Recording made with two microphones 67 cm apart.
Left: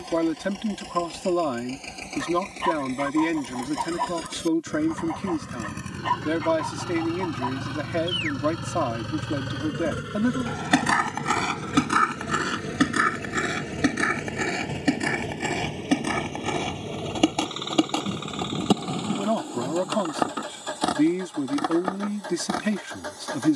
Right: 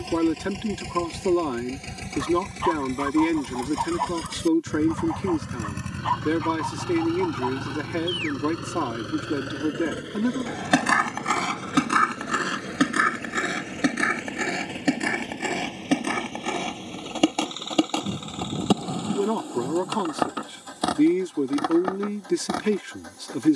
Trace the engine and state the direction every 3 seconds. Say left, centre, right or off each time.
right, right, centre, left, left, left, left, left.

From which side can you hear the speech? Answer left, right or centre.
centre.